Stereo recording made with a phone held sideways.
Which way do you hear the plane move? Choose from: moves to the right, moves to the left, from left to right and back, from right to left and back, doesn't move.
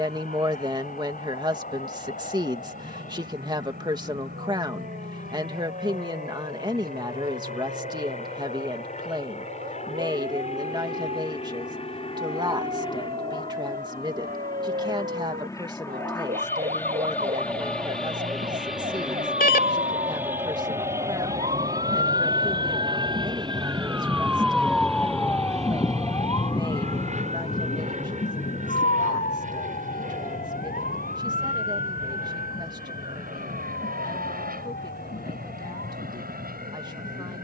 moves to the right.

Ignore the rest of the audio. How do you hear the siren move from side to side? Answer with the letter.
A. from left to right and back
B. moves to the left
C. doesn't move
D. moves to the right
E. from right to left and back
B.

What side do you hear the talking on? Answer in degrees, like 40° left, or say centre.
30° right.